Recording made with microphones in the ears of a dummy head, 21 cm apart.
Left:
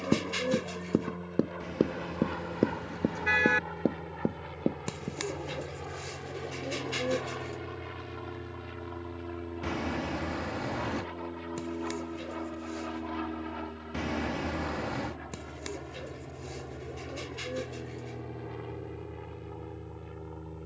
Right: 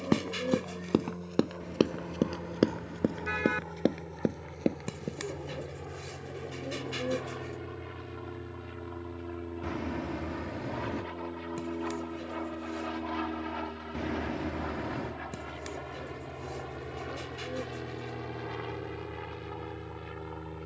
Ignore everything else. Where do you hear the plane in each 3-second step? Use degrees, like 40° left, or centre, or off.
50° left, 40° left, 20° left, centre, 20° right, 30° right, 50° right.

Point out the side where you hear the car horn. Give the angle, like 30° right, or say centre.
30° left.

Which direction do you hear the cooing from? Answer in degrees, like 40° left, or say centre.
20° left.